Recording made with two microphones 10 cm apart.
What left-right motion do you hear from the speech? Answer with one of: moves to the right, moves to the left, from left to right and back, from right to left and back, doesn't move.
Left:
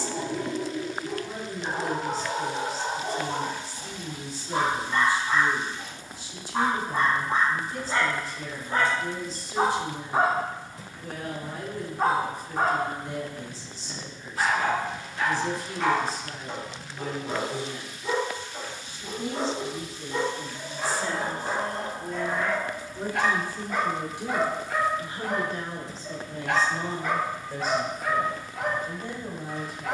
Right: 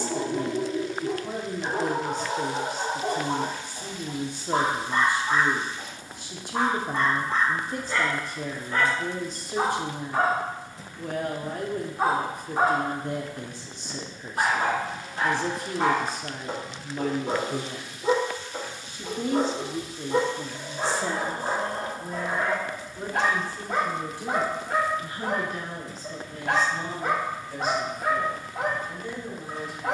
moves to the left.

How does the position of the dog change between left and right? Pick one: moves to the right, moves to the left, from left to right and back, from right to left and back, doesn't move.
from right to left and back.